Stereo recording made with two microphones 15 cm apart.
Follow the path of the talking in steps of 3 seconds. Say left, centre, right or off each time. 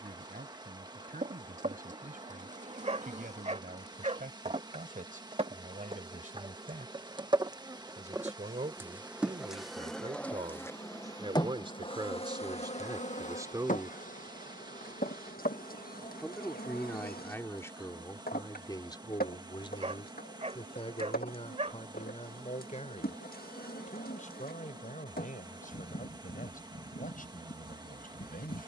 right, right, right, right, right, centre, left, left, left, left.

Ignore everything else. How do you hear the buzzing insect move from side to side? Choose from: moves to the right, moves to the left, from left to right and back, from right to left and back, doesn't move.
moves to the left.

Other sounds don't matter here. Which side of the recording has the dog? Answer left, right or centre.
right.